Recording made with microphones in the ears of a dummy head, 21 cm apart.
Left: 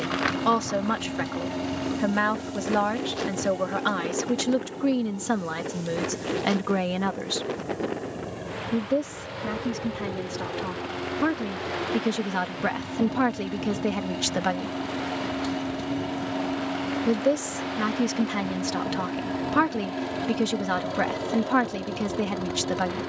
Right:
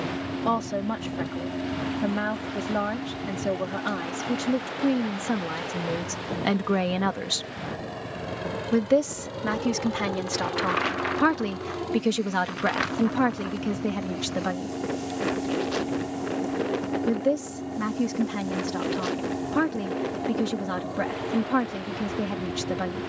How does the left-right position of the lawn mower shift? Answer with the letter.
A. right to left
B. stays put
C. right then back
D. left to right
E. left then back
C.